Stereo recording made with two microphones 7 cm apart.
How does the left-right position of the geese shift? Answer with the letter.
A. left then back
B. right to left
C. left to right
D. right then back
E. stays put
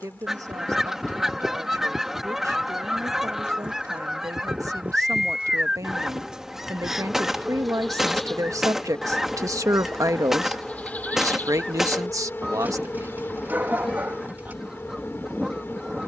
E.